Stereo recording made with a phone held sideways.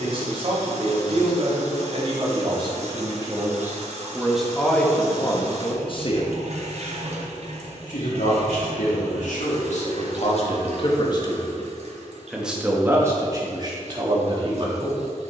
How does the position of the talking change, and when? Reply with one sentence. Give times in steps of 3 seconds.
In this clip you hear the talking on the right from 0 s, in the centre from 3 s, on the left from 6 s and on the right from 12 s.